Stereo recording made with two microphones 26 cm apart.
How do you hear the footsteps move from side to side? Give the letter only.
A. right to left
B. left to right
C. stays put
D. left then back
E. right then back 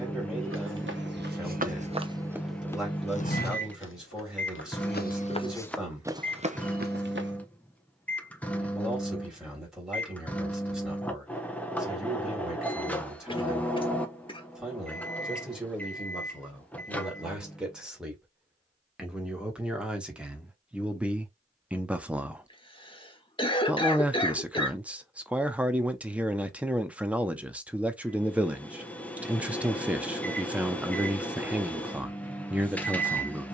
D.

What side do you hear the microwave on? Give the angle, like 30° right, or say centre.
10° left.